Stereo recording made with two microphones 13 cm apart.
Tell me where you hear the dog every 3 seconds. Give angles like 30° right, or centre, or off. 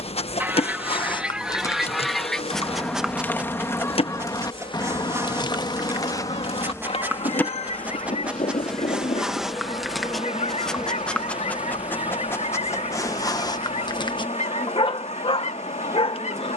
30° left, 20° right, 10° right, centre, 30° left, 50° left.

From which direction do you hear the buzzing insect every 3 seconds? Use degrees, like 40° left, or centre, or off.
50° left, 40° left, 10° left, 10° right, 20° right, 20° right.